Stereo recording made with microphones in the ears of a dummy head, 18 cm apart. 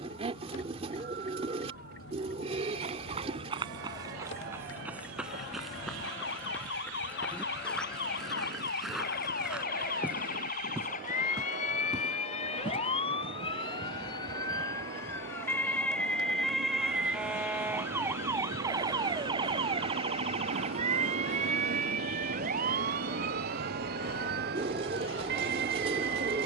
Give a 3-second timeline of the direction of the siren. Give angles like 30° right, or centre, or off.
70° left, 60° left, 50° left, 40° left, 30° left, centre, 20° right, 40° right, 50° right.